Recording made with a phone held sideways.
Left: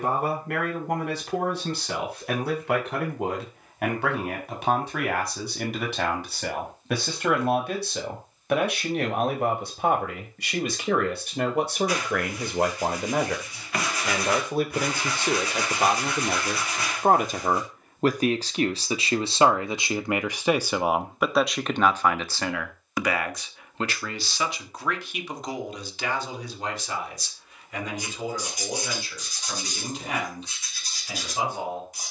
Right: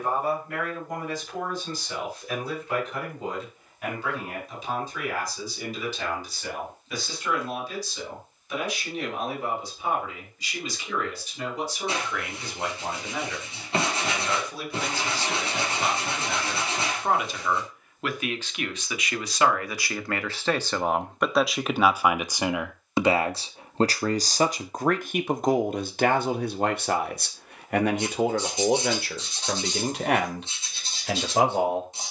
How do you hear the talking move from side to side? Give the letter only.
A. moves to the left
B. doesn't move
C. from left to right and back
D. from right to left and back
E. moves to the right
E.